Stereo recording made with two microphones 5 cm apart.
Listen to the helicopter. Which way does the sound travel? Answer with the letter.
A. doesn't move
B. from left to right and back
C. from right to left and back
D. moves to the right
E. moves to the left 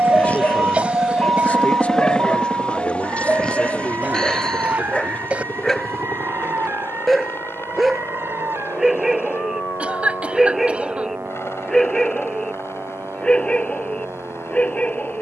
E.